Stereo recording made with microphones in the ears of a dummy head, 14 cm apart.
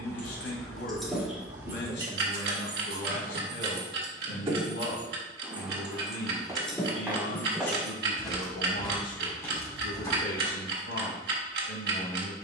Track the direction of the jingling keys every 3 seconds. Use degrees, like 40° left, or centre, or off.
10° right, 30° right, 10° left, off.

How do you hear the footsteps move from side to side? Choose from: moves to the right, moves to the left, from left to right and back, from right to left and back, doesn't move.
moves to the left.